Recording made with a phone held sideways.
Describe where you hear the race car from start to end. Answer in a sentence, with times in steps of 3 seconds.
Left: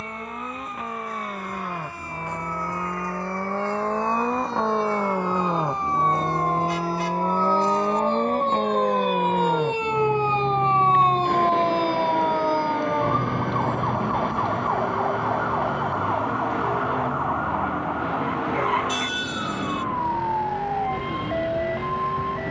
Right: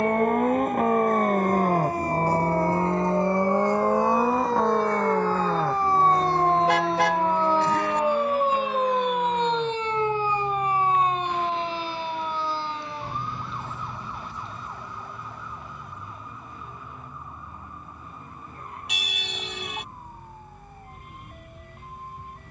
You can hear the race car on the right from 0 s, in the centre from 3 s and on the left from 6 s.